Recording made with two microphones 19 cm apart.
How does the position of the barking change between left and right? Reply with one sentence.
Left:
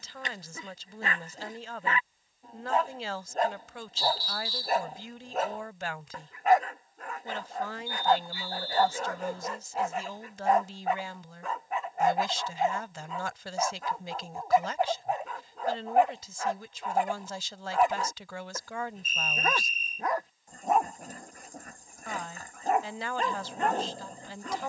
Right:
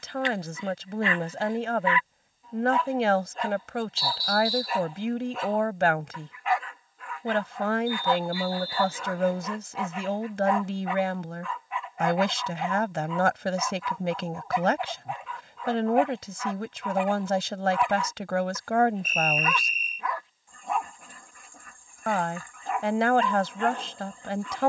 You can hear the barking stay in one place.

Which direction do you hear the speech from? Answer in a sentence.
In this clip you hear the speech on the right.